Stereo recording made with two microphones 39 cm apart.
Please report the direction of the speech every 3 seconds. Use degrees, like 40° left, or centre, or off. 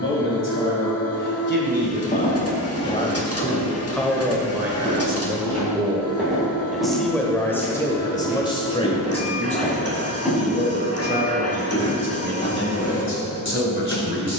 30° left, centre, 10° left, 20° left, 30° left.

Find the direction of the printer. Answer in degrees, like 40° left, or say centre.
40° left.